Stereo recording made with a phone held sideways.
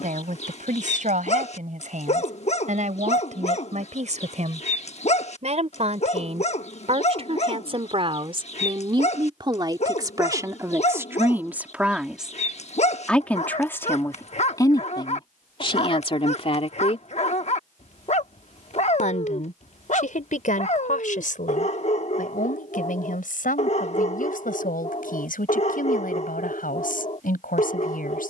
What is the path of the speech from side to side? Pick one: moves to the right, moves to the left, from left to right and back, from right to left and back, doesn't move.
moves to the left.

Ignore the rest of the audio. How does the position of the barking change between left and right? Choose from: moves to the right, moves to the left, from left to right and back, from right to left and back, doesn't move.
doesn't move.